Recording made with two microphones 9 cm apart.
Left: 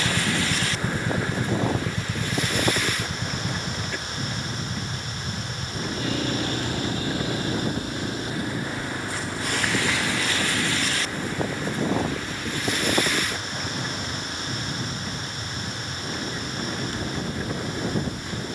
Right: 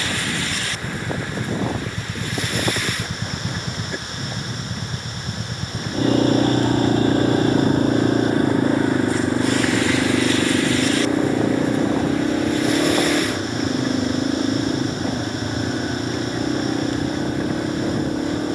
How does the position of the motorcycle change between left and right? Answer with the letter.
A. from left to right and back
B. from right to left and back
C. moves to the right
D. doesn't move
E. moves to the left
C.